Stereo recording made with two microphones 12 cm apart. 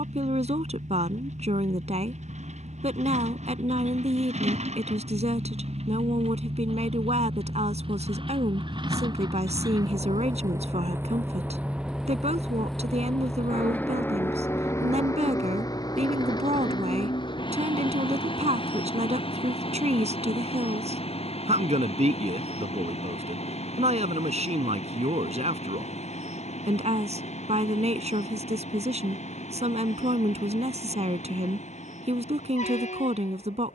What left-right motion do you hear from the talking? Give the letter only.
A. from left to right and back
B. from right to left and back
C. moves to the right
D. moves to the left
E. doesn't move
E.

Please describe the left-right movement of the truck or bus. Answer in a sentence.
You can hear the truck or bus travel towards the left.